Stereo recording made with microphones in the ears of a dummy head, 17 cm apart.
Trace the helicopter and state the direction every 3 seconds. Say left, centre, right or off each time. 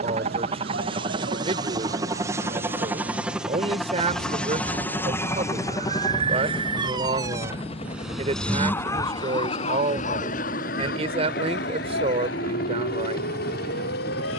right, centre, left, left, left.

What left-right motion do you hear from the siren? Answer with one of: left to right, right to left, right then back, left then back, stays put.
right to left.